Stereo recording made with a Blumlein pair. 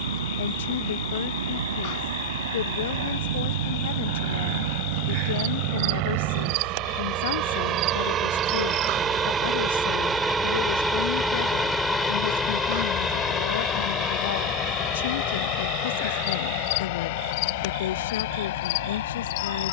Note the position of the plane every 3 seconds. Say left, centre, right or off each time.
right, right, right, centre, left, left, left.